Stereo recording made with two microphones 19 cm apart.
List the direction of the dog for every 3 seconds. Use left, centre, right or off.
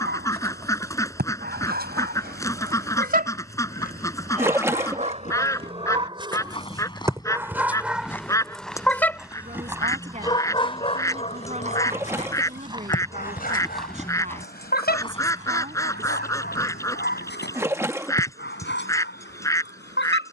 right, right, centre, left, left, left, left.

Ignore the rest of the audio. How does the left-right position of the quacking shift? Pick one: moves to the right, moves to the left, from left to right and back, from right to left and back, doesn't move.
doesn't move.